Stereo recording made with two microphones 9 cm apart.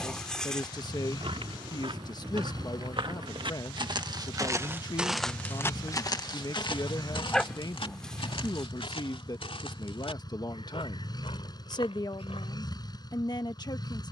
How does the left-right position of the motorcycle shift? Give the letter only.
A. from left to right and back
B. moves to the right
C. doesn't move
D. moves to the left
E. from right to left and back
C.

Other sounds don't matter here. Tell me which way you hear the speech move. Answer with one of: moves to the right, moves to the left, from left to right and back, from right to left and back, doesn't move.
doesn't move.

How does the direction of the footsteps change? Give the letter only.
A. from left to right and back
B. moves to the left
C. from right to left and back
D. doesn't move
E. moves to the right
B.